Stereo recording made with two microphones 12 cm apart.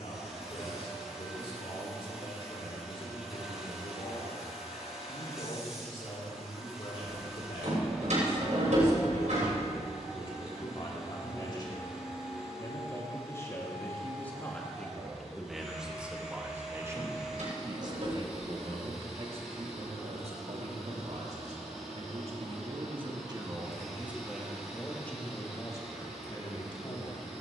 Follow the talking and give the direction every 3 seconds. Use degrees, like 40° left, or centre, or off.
50° left, 50° left, 50° left, 40° left, 20° left, 10° right, 50° right, 50° right, 20° left.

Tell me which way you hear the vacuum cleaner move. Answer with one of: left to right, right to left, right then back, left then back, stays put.
stays put.